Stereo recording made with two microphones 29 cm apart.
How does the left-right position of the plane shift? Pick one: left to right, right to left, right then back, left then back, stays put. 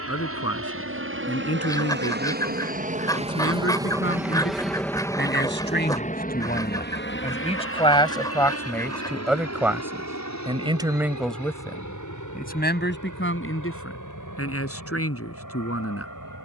right to left.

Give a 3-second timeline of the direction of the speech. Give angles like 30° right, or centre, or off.
50° left, 40° left, 20° left, centre, 40° left, 50° left.